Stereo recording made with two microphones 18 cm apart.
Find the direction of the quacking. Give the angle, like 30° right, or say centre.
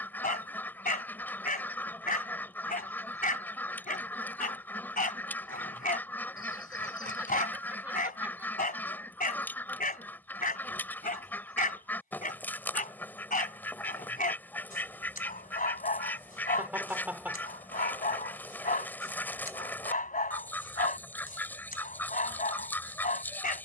10° left.